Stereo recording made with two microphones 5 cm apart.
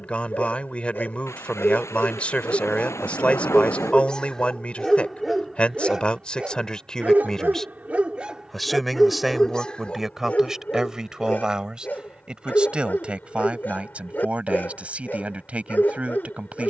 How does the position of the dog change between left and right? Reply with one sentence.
In this clip you hear the dog go right and come back.